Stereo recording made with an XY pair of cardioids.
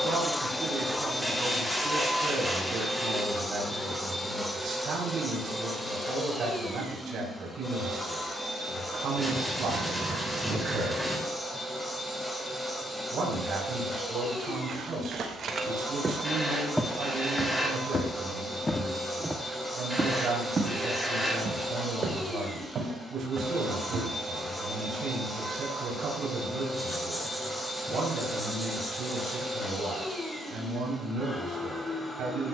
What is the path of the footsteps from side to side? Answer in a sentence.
In this clip you hear the footsteps move from right to left and back again.